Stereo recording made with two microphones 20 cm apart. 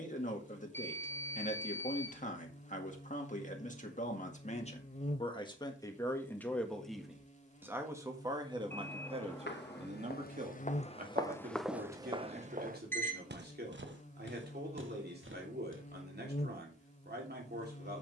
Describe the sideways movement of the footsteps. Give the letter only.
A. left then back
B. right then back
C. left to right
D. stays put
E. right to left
C.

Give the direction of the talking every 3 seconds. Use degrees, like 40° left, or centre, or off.
40° left, 30° left, 10° right, 40° right, 50° right, 50° right.